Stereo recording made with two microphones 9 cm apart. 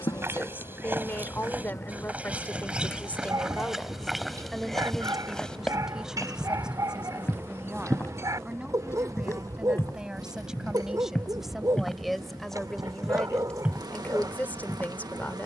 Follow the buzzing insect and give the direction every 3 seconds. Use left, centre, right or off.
left, centre, right, right, right.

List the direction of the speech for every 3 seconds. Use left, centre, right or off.
left, centre, centre, centre, centre.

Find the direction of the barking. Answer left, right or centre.
right.